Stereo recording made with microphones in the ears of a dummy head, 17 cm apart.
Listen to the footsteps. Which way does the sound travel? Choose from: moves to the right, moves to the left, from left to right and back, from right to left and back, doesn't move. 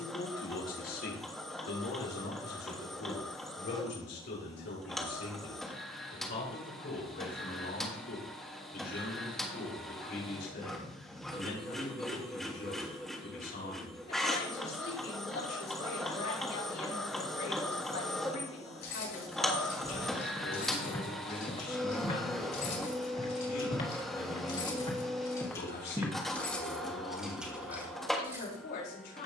from right to left and back.